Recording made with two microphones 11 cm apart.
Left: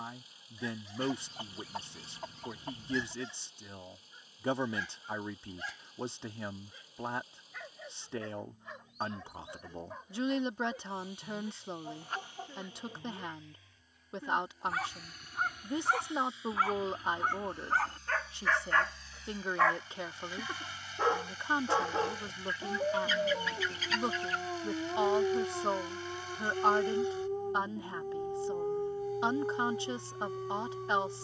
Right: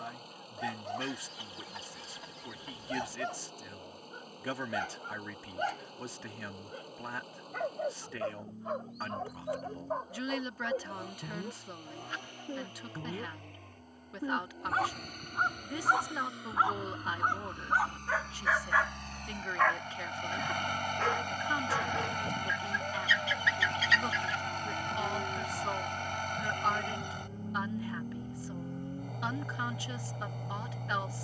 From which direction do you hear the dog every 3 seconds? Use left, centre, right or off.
right, right, right, right, right, right, centre, left, left, left, left.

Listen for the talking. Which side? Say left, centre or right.
left.